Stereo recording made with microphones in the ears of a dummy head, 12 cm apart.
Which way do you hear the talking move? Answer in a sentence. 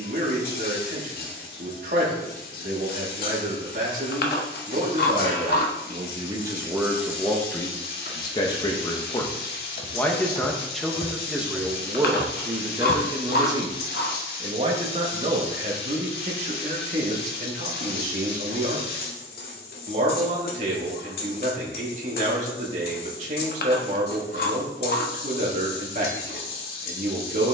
In this clip you hear the talking go left and come back.